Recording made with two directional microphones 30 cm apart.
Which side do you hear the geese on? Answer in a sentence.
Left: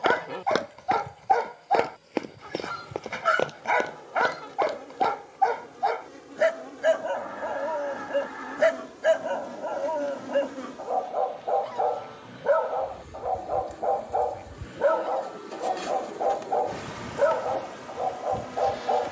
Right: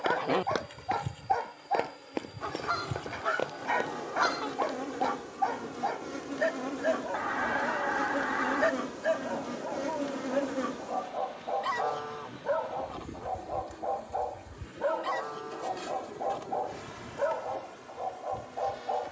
You can hear the geese on the right.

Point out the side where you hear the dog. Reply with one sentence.
In this clip you hear the dog on the left.